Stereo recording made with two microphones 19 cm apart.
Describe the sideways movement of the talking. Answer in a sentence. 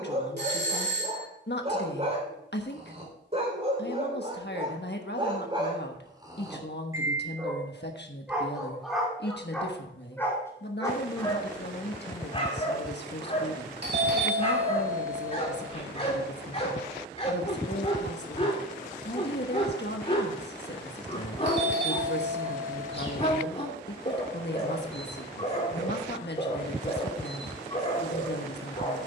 You can hear the talking stay in one place.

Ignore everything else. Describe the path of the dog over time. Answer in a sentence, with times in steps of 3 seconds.
You can hear the dog on the right from 0 s, in the centre from 6 s and on the left from 12 s.